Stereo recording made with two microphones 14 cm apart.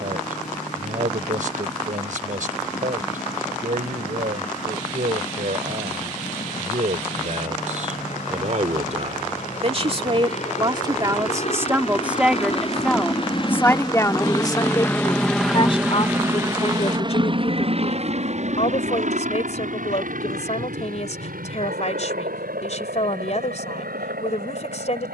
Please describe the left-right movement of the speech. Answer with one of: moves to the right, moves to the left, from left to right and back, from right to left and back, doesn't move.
moves to the left.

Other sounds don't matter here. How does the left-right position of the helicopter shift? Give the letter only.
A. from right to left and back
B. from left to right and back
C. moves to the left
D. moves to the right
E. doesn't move
D.